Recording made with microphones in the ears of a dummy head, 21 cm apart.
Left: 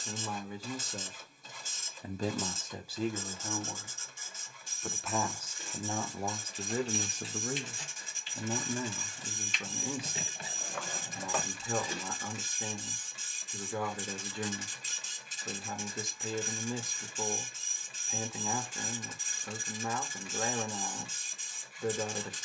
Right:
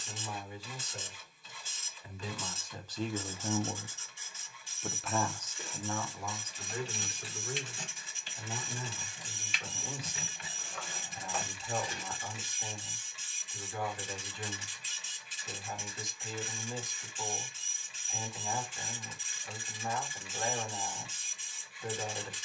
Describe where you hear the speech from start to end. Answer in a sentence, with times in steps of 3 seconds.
You can hear the speech on the left from 0 s, in the centre from 3 s and on the left from 6 s.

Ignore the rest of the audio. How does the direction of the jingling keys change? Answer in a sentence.
You can hear the jingling keys move to the left.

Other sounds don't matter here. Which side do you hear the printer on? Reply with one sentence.
In this clip you hear the printer on the left.